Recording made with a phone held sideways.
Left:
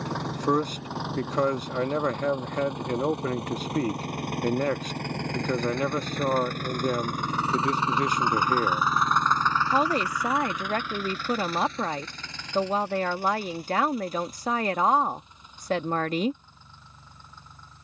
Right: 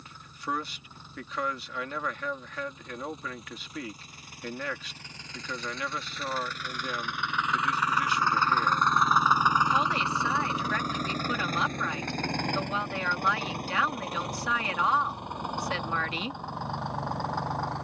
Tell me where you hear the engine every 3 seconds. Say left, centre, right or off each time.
left, left, left, right, right, right.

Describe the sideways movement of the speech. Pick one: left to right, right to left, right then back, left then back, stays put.
stays put.